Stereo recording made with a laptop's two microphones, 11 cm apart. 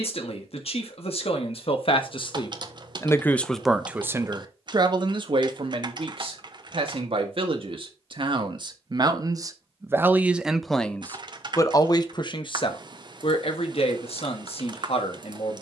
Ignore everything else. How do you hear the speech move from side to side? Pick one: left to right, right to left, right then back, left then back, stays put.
right then back.